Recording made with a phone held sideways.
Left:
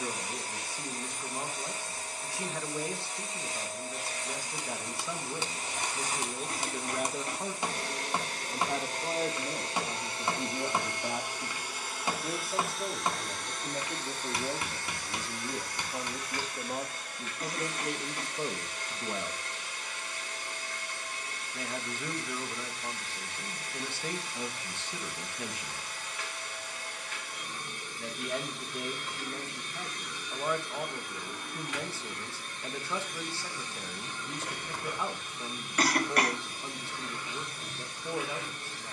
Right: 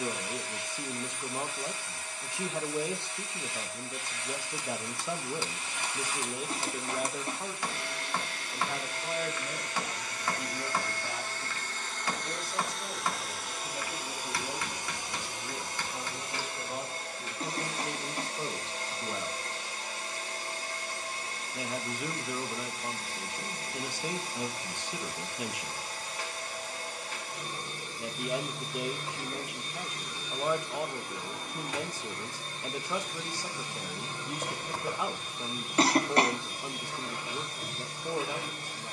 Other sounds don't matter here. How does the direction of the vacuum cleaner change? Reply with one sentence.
You can hear the vacuum cleaner travel towards the right.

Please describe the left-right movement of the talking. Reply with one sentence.
In this clip you hear the talking go left and come back.